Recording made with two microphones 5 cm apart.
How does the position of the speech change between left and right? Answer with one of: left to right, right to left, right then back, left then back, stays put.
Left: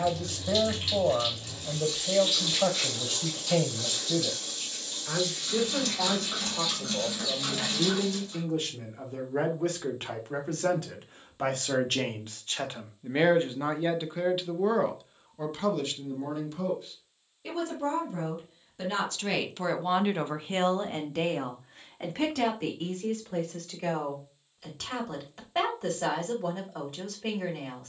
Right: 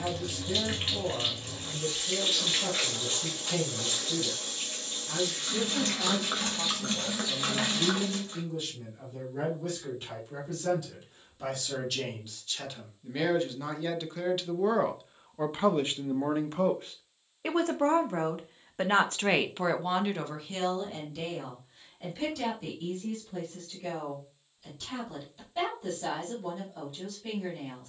right then back.